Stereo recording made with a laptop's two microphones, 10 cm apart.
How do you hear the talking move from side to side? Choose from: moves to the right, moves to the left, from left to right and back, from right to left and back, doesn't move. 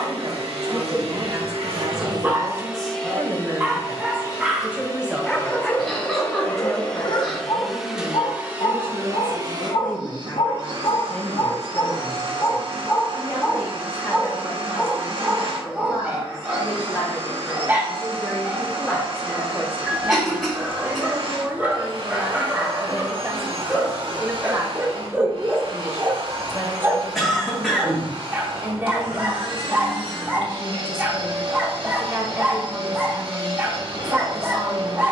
from right to left and back.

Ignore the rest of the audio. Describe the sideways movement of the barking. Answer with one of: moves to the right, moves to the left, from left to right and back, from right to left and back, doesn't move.
from right to left and back.